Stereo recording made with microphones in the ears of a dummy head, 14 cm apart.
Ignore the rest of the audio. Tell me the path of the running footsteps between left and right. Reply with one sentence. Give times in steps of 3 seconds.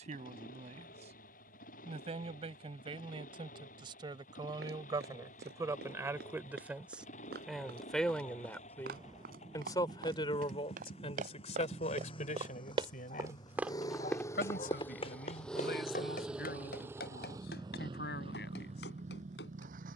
In this clip you hear the running footsteps not at all from 0 s, on the right from 3 s, in the centre from 12 s and on the left from 15 s.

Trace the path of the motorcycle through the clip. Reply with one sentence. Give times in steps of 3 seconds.
You can hear the motorcycle on the left from 0 s, in the centre from 15 s and on the right from 18 s.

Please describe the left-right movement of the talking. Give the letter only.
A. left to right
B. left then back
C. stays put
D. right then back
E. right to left
E.